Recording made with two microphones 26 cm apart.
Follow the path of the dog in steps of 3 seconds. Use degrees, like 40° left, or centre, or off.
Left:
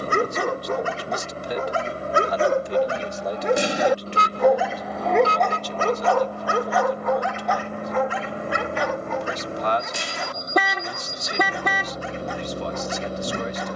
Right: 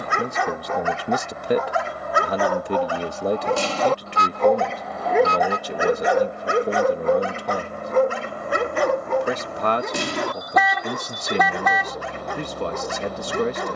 40° left, centre, 40° right, 70° right, 70° right.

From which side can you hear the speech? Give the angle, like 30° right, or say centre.
60° right.